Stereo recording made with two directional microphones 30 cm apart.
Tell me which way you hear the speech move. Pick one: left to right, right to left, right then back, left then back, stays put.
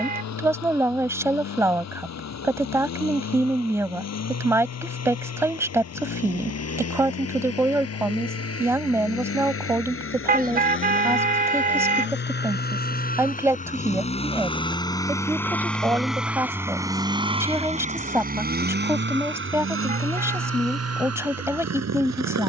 stays put.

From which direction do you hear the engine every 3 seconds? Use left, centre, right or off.
left, left, left, left, left, centre, right, right.